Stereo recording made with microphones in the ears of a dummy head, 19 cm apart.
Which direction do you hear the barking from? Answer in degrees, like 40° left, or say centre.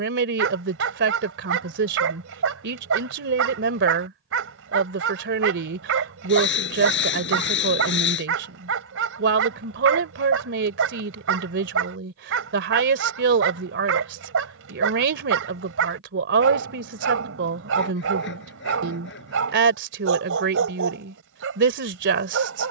70° right.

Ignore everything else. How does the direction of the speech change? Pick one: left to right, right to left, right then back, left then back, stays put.
stays put.